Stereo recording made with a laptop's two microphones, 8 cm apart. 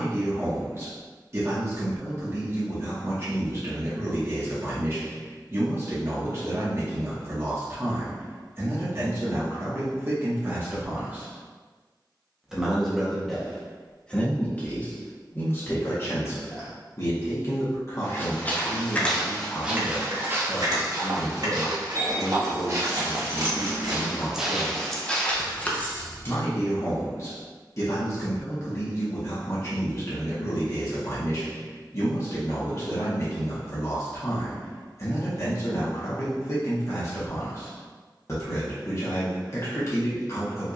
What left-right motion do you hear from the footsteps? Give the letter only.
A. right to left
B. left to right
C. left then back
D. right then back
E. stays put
D.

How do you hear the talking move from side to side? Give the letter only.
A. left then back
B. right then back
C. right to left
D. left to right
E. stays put
C.